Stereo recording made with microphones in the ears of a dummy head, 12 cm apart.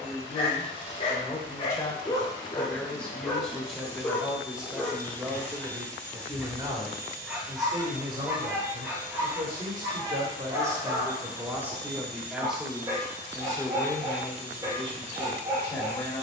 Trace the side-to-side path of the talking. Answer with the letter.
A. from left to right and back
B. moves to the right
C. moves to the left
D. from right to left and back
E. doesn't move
A.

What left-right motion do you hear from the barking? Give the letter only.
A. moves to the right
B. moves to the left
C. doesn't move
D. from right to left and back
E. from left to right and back
A.